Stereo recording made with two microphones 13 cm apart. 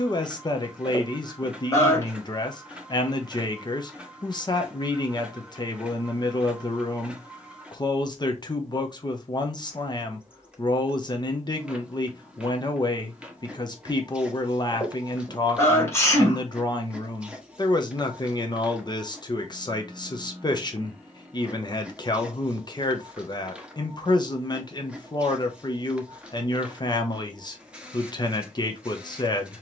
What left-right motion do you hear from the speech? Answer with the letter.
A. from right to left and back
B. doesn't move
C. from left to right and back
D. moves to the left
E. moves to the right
B.